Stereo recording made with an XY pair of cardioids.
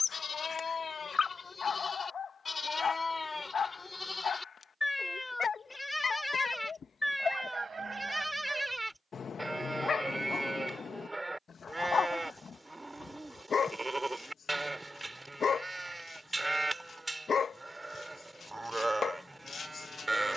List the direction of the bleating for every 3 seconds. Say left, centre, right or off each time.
left, left, centre, centre, centre, centre, centre.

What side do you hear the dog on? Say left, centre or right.
left.